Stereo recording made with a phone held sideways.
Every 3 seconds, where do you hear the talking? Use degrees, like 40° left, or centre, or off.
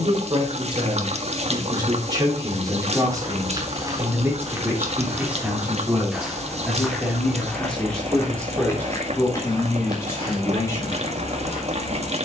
30° right, 10° right, centre, 20° left.